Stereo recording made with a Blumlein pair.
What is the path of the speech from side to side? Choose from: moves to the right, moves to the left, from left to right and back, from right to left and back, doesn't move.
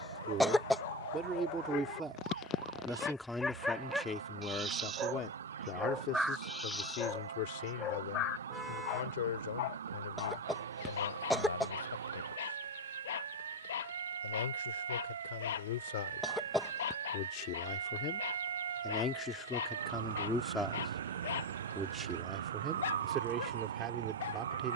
from right to left and back.